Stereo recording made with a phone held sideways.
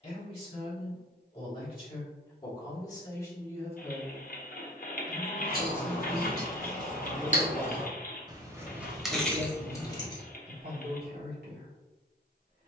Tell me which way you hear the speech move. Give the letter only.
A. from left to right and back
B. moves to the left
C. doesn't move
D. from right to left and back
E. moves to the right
E.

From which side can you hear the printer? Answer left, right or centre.
left.